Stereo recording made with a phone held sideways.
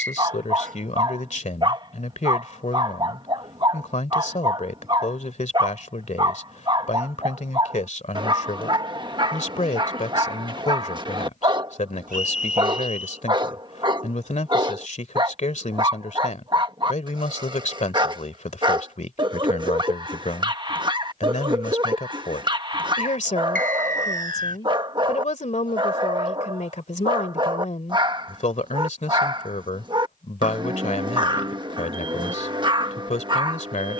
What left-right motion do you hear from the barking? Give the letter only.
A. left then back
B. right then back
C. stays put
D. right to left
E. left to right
C.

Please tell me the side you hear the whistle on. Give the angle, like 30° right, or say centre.
80° right.